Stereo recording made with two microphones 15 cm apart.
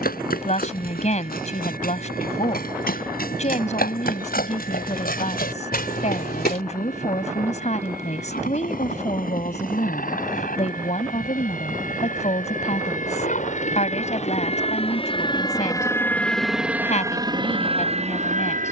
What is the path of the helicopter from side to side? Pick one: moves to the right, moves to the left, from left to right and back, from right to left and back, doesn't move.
moves to the right.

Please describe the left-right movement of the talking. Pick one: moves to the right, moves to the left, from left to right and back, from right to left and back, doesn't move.
doesn't move.